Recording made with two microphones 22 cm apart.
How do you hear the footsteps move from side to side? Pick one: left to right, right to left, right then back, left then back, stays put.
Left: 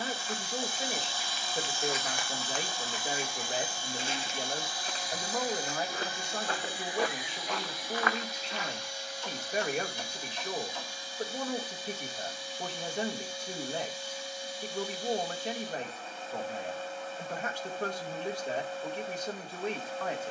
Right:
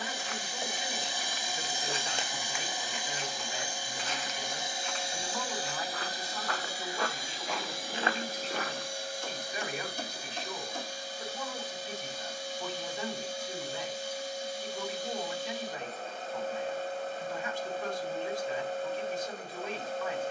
left then back.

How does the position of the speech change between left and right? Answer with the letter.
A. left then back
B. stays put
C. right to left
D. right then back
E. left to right
B.